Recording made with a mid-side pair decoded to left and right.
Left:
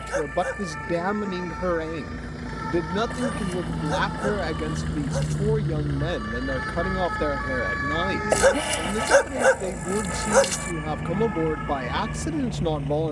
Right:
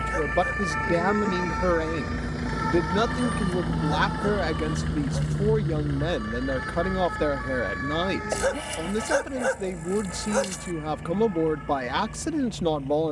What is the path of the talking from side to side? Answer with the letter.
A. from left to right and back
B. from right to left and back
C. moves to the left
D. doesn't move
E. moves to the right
D.